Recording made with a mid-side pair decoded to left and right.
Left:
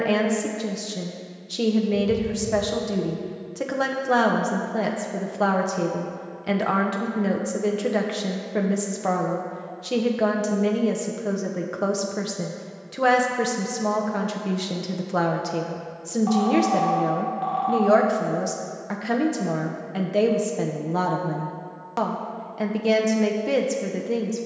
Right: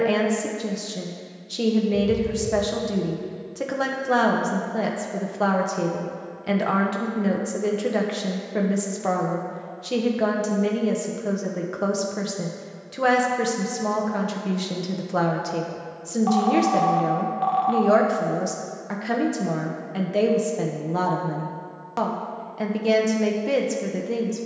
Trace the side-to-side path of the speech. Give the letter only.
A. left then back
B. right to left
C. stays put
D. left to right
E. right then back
C.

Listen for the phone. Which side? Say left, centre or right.
right.